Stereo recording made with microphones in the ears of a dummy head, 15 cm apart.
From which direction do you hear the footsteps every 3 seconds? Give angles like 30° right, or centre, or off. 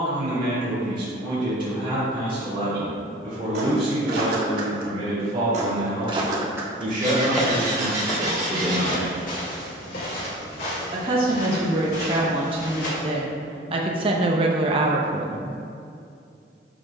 off, 60° right, 10° left, 60° left, 70° left, off.